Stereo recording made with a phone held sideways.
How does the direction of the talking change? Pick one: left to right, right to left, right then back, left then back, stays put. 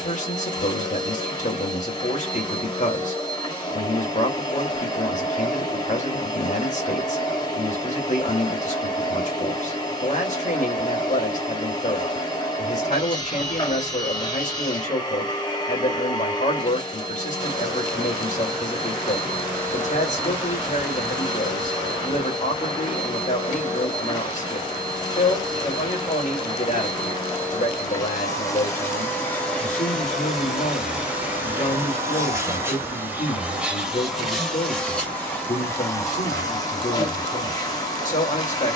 stays put.